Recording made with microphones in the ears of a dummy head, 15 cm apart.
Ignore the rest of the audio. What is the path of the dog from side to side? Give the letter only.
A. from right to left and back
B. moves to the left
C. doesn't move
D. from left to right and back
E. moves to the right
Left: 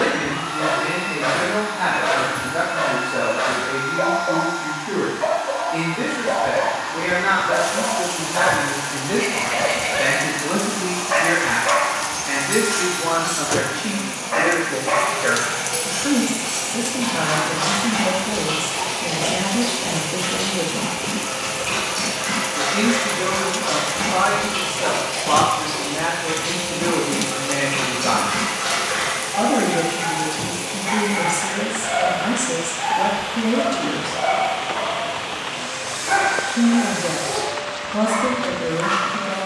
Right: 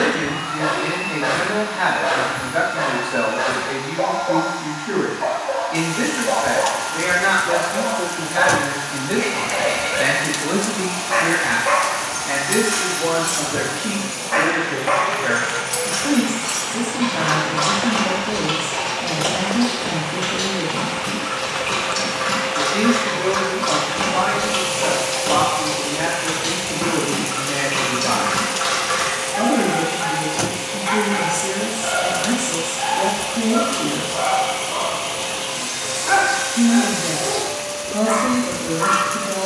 E.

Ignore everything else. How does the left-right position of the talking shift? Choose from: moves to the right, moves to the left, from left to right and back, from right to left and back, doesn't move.
moves to the left.